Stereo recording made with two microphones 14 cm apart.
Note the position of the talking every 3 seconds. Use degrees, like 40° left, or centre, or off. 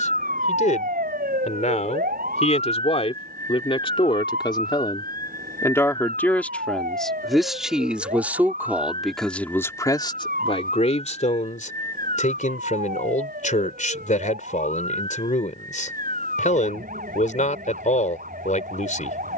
60° left, 30° left, centre, 40° left, 60° left, 60° left, 60° left.